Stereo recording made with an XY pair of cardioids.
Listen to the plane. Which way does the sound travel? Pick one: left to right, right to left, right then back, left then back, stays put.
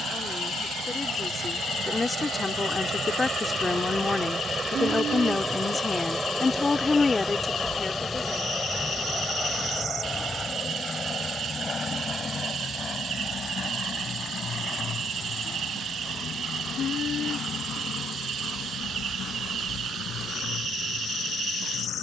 right to left.